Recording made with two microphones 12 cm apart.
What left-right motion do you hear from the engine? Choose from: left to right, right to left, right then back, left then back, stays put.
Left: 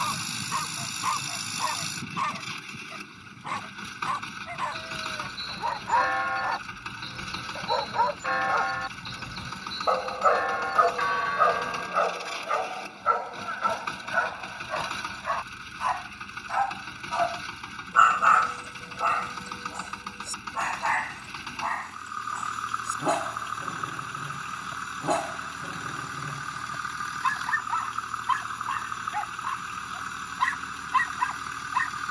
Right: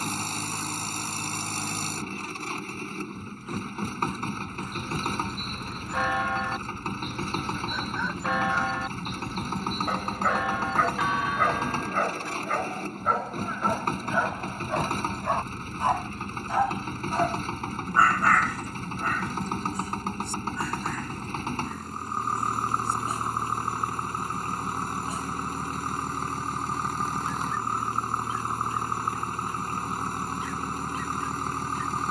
stays put.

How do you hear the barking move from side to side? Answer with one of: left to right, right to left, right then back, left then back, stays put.
right then back.